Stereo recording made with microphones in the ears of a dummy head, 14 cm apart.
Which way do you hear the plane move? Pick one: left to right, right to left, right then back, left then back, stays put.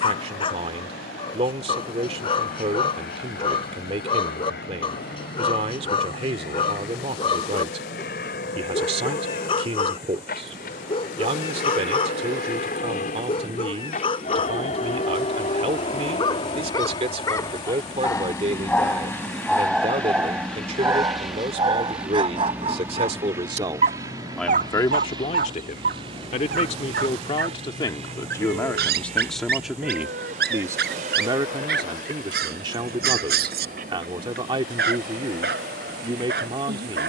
left to right.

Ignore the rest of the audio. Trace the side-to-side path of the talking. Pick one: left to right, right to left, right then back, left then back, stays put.
left then back.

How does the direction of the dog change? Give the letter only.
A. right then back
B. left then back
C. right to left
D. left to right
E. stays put
D.